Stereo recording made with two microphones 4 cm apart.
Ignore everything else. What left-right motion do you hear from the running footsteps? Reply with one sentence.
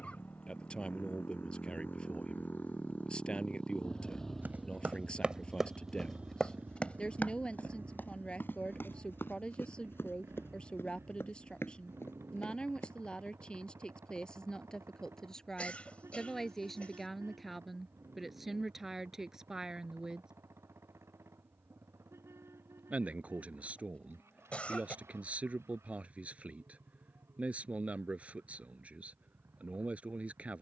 You can hear the running footsteps travel towards the left.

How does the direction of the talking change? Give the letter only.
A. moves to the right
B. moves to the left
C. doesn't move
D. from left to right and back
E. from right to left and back
A.